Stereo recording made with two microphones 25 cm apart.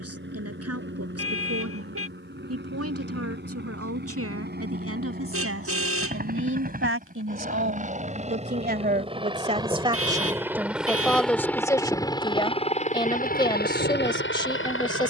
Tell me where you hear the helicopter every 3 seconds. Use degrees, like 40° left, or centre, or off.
50° right, 40° right, 30° right, 10° right, 40° left.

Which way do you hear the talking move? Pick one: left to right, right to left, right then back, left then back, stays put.
right to left.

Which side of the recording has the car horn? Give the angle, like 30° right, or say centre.
60° right.